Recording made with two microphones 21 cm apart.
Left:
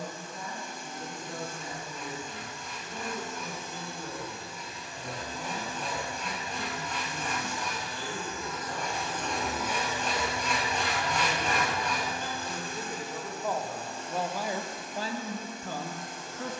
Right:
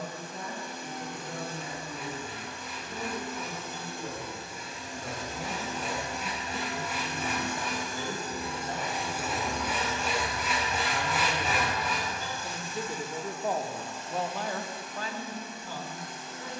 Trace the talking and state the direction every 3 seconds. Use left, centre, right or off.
right, right, right, right, centre, left.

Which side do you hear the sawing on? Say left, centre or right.
centre.